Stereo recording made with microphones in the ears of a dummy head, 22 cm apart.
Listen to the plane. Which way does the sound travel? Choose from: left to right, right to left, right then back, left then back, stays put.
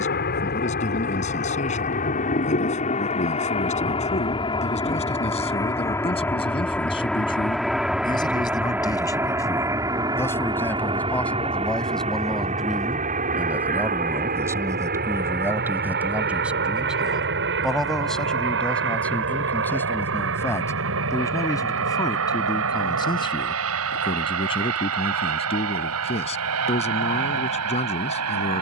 left to right.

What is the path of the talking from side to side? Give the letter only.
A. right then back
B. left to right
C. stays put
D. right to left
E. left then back
A.